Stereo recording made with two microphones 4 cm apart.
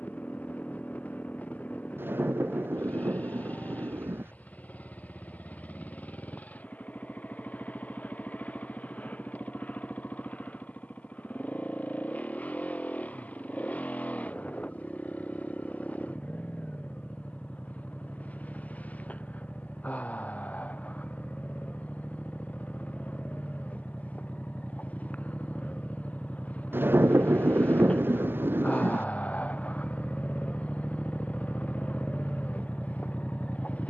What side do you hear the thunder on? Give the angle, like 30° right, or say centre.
50° right.